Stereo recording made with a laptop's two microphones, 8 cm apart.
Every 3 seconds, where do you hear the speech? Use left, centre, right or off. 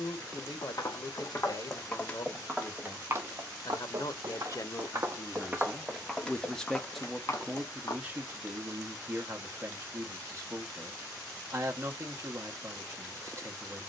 left, left, centre, right, right.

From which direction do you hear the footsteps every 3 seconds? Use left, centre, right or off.
left, right, left, off, off.